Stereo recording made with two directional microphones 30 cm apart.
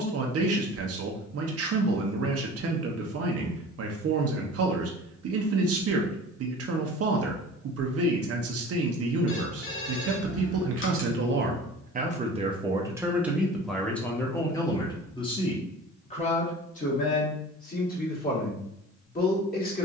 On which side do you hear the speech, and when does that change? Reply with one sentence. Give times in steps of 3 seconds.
In this clip you hear the speech on the right from 0 s, in the centre from 12 s and on the left from 15 s.